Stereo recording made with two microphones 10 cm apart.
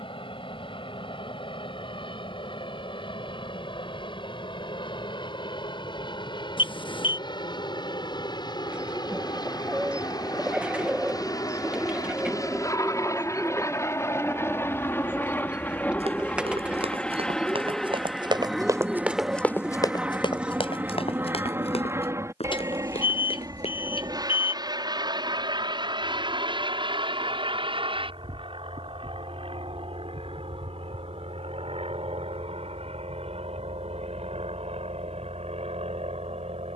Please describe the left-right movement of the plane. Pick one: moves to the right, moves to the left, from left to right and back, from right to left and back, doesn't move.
moves to the right.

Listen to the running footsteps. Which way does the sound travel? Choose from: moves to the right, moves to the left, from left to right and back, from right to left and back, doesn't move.
moves to the left.